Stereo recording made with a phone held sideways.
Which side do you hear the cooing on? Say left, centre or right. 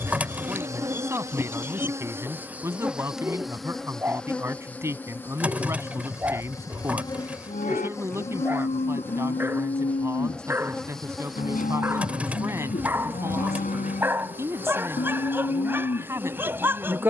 centre.